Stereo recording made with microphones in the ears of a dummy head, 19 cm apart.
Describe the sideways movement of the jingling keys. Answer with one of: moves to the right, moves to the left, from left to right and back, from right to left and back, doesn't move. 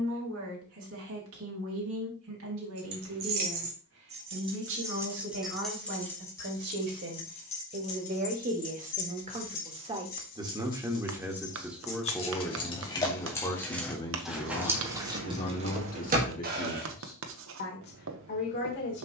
from right to left and back.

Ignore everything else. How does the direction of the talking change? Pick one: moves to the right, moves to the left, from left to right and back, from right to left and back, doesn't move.
moves to the left.